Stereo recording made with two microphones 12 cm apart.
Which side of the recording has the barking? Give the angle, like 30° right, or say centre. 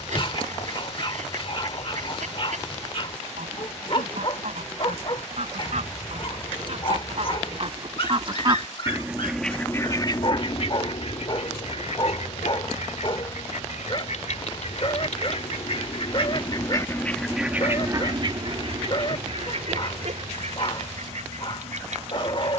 40° left.